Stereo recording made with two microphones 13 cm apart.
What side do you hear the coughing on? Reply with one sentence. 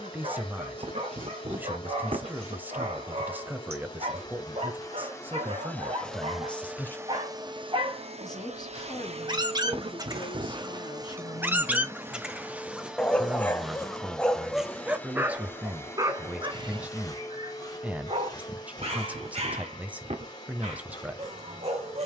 In this clip you hear the coughing on the right.